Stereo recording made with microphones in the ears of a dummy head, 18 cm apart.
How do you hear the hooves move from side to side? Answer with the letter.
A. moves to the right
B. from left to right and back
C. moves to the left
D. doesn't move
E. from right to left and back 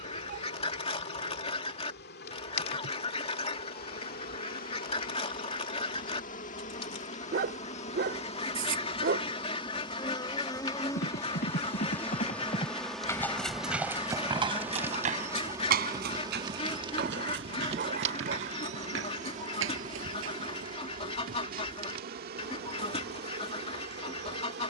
A.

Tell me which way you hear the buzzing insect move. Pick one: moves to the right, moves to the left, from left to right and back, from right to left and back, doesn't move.
moves to the right.